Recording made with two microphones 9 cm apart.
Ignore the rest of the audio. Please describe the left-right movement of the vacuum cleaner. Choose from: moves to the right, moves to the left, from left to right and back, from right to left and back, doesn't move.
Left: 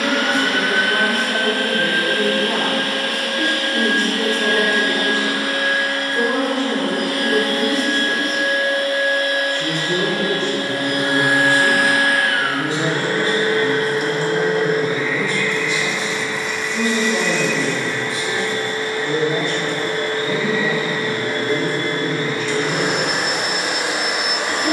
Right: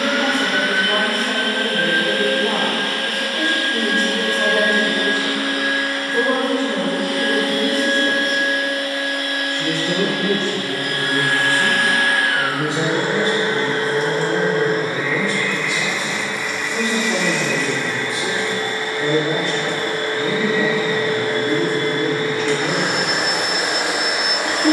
moves to the right.